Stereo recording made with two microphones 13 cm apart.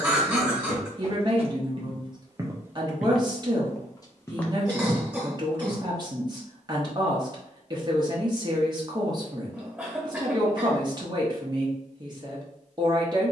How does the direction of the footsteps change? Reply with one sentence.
In this clip you hear the footsteps go left and come back.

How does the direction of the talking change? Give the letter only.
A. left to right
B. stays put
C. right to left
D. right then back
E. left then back
B.